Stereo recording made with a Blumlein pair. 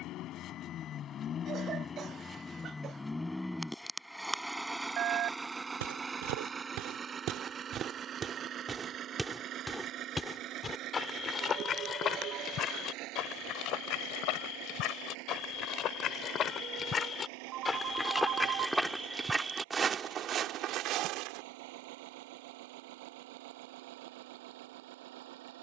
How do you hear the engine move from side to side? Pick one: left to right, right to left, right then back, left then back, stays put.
left to right.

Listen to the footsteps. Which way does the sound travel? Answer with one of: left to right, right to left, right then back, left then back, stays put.
left then back.